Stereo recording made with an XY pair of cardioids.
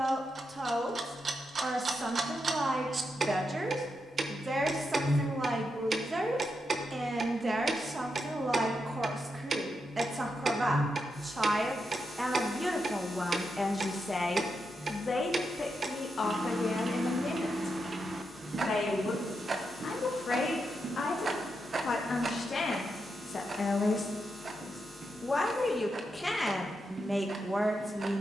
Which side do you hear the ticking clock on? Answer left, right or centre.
right.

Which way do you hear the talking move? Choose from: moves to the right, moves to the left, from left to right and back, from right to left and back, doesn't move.
from right to left and back.